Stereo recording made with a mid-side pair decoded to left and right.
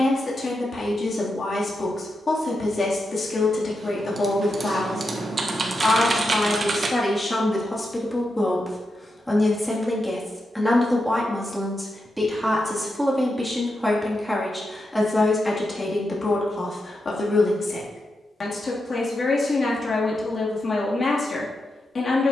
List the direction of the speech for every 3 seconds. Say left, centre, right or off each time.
left, left, left, centre, centre, left, left, left.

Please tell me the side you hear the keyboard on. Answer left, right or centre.
right.